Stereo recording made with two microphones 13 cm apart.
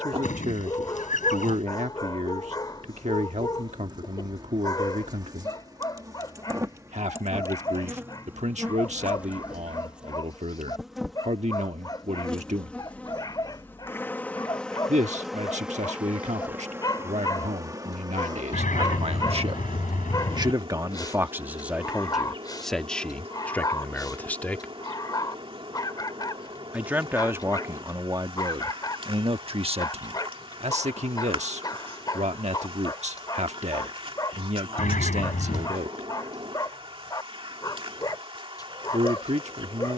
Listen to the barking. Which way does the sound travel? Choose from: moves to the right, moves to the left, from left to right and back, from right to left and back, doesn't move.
doesn't move.